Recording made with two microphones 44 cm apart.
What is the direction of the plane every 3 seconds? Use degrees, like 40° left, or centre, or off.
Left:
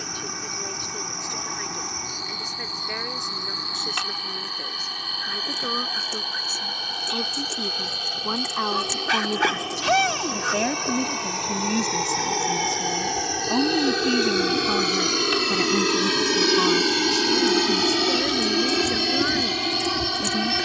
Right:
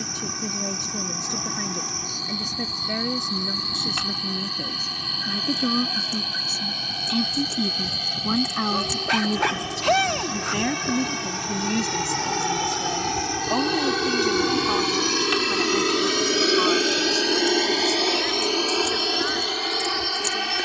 60° right, 50° right, 50° right, 40° right, 20° right, 10° left, 40° left.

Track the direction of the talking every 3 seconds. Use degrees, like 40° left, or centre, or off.
60° right, 50° right, 40° right, 10° right, 20° left, 50° left, 60° left.